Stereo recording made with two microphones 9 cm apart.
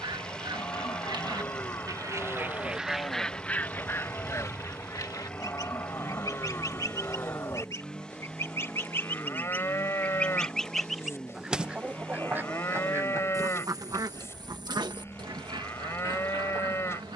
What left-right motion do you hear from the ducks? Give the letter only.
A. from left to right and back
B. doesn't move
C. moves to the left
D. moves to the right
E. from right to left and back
E.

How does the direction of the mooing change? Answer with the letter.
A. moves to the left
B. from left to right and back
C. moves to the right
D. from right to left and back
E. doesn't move
E.